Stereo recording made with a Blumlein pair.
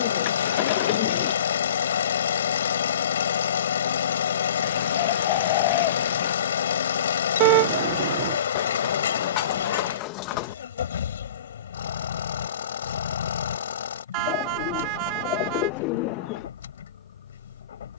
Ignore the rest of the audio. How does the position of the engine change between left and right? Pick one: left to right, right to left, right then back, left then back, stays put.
stays put.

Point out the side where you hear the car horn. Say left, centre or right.
right.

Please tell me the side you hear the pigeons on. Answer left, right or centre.
left.